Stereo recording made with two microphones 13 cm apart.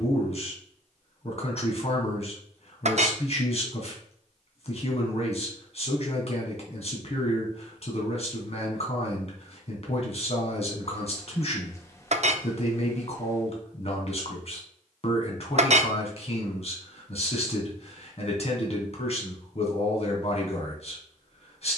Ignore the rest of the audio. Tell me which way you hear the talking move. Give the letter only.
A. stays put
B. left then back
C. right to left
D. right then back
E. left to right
A.